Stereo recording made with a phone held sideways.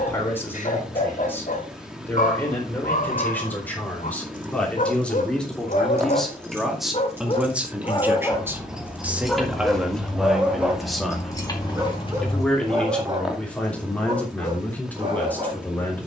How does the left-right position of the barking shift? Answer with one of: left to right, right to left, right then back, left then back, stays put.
left to right.